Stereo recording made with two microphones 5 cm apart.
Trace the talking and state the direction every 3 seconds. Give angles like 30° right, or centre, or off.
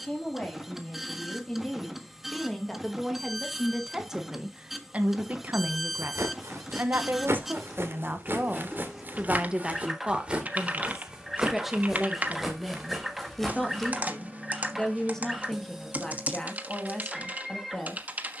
10° left, 20° right, 40° right, 10° right, centre, 10° left.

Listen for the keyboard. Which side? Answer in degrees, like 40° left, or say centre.
30° right.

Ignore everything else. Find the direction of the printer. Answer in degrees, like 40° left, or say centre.
centre.